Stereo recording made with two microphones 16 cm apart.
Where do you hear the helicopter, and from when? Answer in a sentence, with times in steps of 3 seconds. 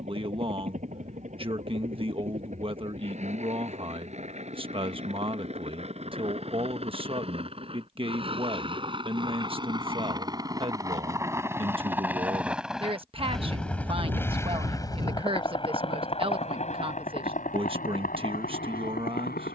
In this clip you hear the helicopter on the right from 0 s, in the centre from 12 s and on the left from 15 s.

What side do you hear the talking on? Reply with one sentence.
You can hear the talking on the right.